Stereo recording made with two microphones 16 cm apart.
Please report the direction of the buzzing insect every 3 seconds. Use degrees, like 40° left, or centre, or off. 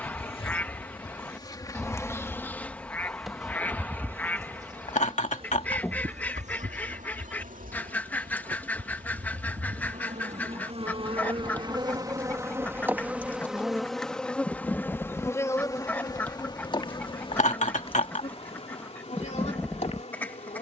20° left, 20° right, 60° right, 40° right, centre, 30° left, 40° left.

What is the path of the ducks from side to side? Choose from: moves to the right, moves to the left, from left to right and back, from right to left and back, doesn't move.
doesn't move.